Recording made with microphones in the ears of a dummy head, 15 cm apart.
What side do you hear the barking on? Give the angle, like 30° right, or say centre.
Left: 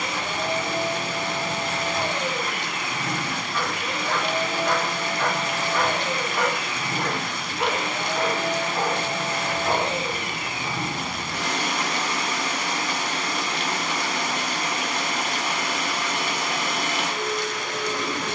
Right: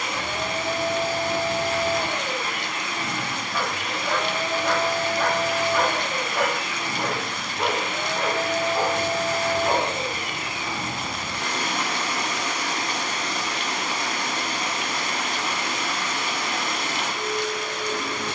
10° right.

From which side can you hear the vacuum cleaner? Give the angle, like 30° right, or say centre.
60° left.